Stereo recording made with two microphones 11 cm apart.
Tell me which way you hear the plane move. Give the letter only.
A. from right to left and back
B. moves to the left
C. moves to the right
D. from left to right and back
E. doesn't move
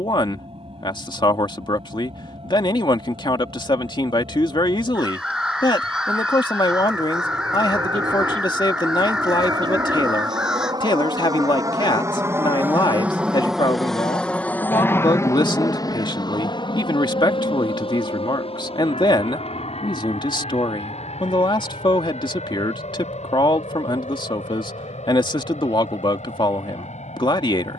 B.